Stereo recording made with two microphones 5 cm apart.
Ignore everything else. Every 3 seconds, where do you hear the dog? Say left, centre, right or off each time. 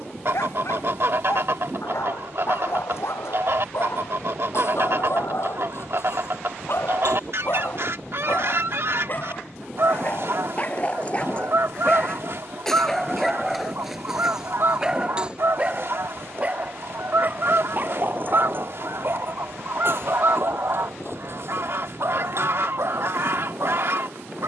left, left, left, left, centre, right, right, right.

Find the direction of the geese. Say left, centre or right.
right.